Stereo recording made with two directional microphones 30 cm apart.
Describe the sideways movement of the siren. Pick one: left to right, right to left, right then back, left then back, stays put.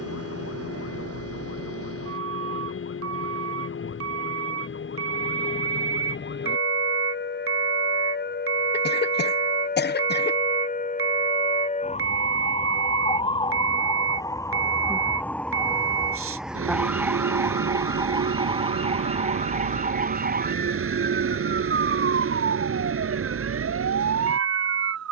left to right.